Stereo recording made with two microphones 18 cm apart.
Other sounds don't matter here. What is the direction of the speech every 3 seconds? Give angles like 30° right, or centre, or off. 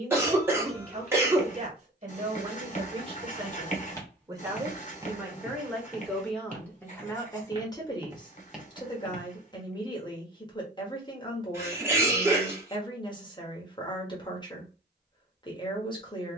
40° right, 20° right, 20° left, 20° left, 20° left, 20° left.